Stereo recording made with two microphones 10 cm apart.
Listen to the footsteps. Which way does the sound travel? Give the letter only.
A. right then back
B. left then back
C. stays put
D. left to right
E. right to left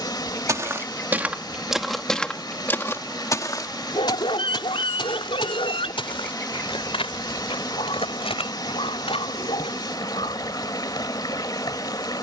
E.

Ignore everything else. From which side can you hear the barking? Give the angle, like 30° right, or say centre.
70° left.